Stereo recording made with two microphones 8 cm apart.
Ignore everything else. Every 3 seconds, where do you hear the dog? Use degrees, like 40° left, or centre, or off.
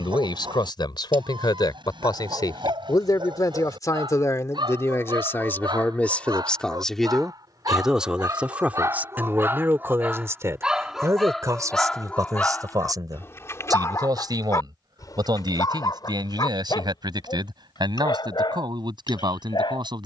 70° right, 60° right, 50° right, 10° right, 30° left, 50° left, 60° left.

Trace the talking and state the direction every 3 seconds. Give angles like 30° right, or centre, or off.
60° left, 40° left, centre, 30° right, 50° right, 60° right, 60° right.